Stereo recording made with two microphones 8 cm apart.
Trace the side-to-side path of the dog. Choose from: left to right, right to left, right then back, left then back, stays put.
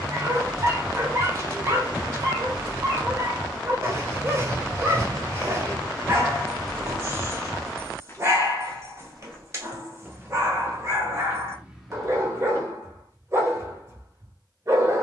stays put.